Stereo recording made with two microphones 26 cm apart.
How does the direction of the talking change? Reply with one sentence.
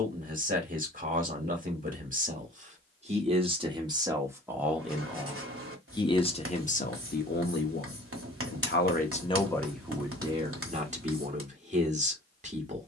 You can hear the talking go left and come back.